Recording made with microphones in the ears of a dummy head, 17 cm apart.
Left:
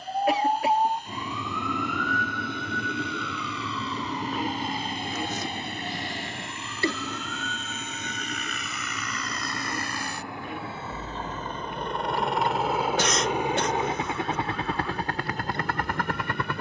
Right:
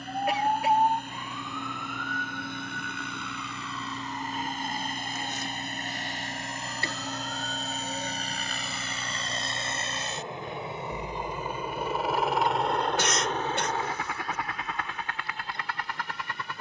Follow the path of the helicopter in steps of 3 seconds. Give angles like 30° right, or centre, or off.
50° right, 40° right, 40° right, 20° right, 10° left, 40° left.